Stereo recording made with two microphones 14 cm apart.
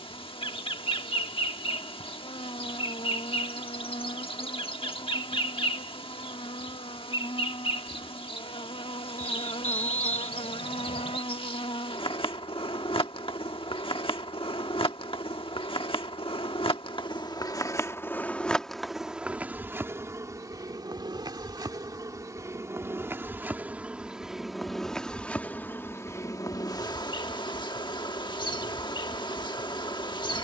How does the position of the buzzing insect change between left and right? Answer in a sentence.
In this clip you hear the buzzing insect move from left to right and back again.